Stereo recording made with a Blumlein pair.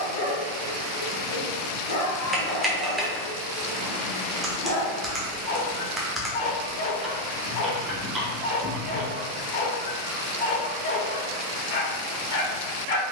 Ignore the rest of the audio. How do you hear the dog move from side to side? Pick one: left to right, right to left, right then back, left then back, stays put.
stays put.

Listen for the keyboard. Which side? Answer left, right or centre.
centre.